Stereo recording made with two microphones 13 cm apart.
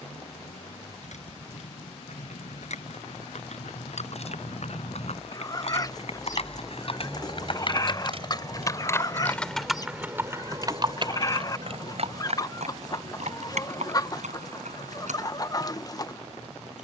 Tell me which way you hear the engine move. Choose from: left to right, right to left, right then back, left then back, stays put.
left to right.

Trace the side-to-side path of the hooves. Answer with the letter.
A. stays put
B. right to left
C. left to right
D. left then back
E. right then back
C.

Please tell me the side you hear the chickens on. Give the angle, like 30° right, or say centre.
30° left.